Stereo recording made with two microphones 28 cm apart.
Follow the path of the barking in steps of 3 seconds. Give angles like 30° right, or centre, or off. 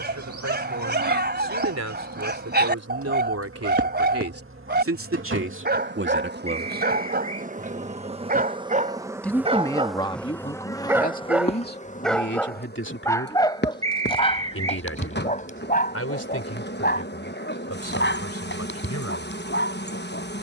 40° right, 40° right, 30° right, 10° right, 20° left, 30° left, 40° left.